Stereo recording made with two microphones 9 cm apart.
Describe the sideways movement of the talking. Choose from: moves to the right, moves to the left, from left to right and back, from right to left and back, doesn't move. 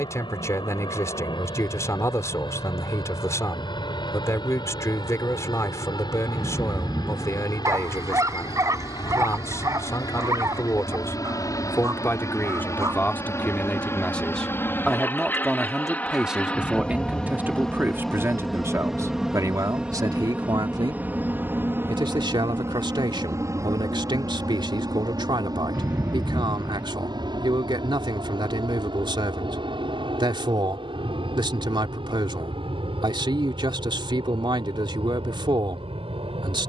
moves to the right.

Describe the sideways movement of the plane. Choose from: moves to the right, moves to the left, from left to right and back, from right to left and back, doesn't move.
moves to the right.